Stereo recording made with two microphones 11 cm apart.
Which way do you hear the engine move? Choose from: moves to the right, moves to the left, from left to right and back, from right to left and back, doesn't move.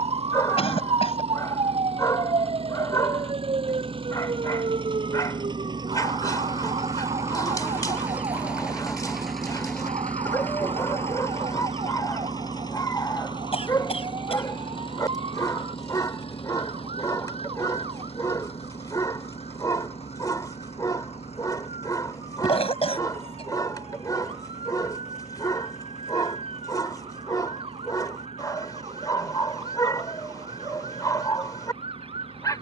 moves to the left.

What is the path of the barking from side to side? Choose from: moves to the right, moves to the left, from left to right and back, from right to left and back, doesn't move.
doesn't move.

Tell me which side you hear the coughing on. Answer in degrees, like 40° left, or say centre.
60° left.